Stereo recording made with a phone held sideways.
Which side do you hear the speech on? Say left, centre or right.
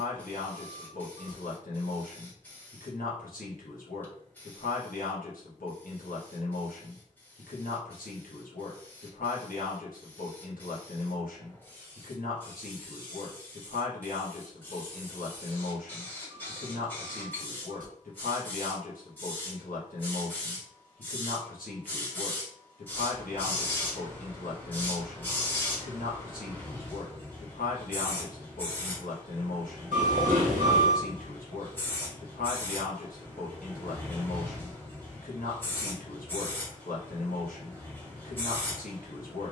left.